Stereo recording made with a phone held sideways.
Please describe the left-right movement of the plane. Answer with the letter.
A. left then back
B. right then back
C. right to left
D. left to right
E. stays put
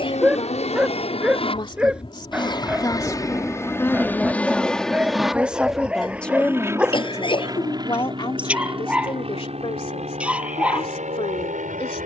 D.